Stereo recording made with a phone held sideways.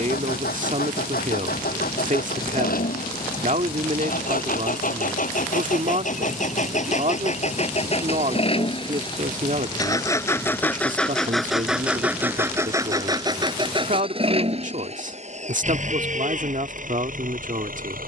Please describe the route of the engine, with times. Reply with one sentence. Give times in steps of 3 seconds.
In this clip you hear the engine on the left from 0 s, in the centre from 9 s and on the right from 12 s.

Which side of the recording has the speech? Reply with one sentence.
In this clip you hear the speech on the right.